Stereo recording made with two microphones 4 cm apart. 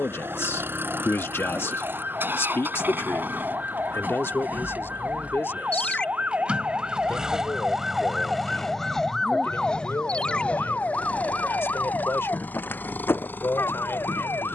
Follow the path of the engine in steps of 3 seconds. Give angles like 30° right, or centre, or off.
60° right, 50° right, 10° right, 30° left, 50° left.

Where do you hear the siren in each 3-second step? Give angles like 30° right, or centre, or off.
60° right, 50° right, 20° right, 30° left, 60° left.